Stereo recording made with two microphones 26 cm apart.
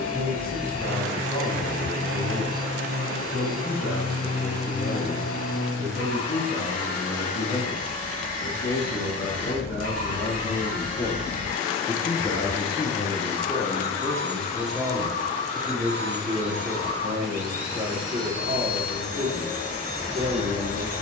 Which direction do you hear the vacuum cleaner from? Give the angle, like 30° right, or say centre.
60° left.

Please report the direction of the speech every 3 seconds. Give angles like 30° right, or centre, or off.
70° left, 60° left, 60° left, 50° left, 20° left, 30° right, 50° right.